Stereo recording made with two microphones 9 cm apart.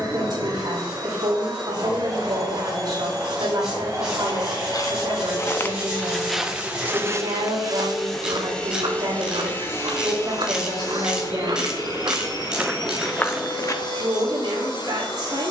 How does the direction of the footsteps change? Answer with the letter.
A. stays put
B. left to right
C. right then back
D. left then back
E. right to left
C.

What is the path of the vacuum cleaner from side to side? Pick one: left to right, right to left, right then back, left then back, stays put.
right to left.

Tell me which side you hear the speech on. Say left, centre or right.
right.